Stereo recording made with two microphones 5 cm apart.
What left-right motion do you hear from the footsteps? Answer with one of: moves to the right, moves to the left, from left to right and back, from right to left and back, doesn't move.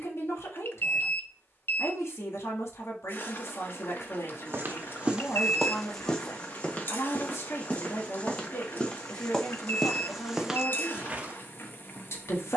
from right to left and back.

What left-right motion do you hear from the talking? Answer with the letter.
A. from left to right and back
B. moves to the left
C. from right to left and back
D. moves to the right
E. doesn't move
E.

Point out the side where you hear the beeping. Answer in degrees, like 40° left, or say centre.
50° left.